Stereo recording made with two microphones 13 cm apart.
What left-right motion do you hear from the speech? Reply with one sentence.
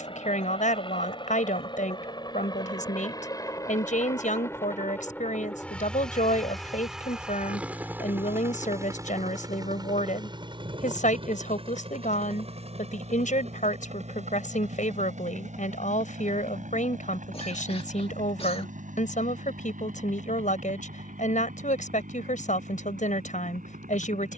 You can hear the speech stay put.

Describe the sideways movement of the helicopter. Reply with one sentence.
In this clip you hear the helicopter move to the right.